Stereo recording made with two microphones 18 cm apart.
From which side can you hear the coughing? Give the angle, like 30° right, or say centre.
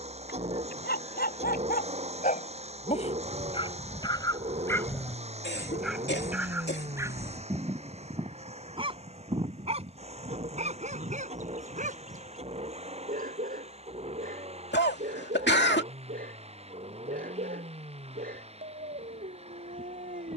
70° left.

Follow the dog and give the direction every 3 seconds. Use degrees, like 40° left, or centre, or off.
50° left, 20° left, 20° right, 40° right, 50° right, 50° right, 50° right.